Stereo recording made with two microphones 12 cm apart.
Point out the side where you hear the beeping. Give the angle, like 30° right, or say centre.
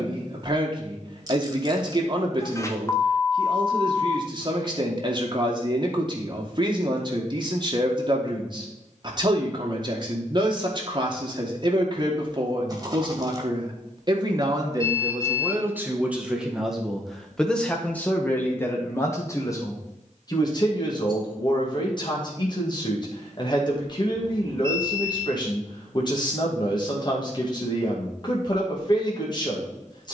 20° left.